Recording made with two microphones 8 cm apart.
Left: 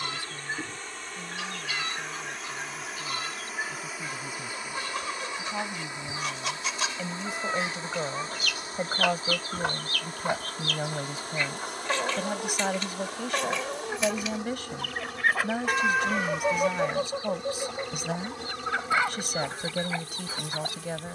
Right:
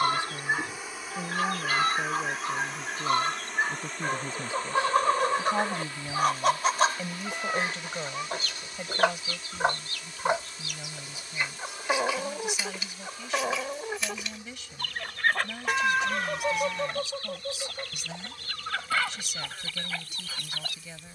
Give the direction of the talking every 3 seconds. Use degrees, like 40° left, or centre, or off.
40° right, 30° right, 10° left, 50° left, 50° left, 50° left, 50° left.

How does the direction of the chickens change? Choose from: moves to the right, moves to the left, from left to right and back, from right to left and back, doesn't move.
moves to the left.